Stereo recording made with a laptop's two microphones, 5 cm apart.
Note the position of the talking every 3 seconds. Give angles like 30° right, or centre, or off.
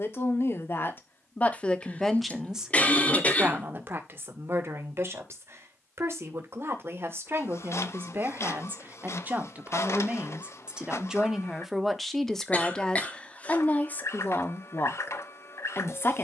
20° left, 50° right, 50° right, 20° right, 20° left, 50° left.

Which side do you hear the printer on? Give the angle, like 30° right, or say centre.
60° left.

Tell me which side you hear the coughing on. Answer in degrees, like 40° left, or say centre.
30° left.